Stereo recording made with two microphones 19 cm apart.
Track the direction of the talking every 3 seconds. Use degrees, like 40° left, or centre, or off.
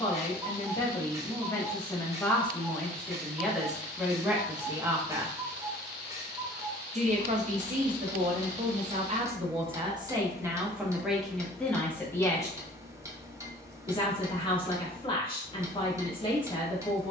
20° left, 10° right, 50° right, 10° right, 20° left, 30° left.